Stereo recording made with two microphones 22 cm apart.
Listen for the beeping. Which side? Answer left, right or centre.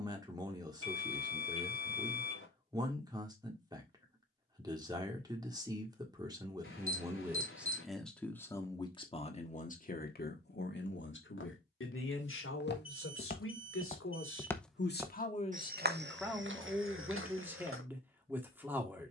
left.